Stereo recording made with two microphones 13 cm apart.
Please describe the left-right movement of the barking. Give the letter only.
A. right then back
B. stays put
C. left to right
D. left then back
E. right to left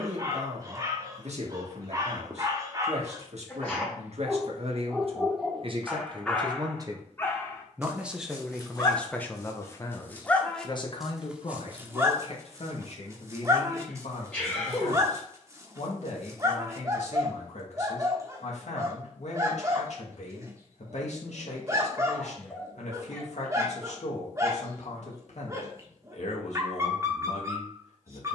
D.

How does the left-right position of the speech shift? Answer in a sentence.
You can hear the speech travel towards the left.